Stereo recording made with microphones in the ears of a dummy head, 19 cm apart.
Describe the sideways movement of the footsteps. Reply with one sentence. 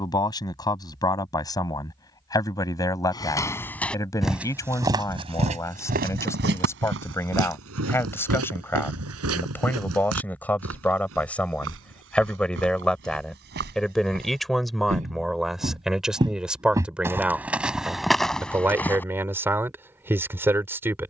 In this clip you hear the footsteps move from left to right and back again.